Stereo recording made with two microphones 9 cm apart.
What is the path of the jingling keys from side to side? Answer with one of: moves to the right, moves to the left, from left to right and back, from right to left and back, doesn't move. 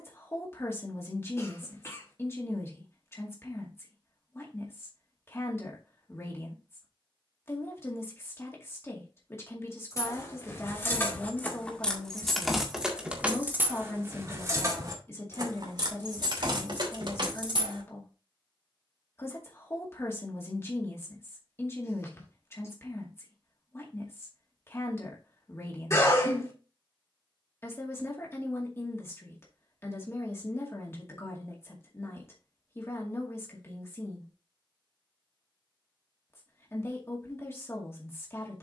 moves to the right.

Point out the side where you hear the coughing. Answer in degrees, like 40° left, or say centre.
30° left.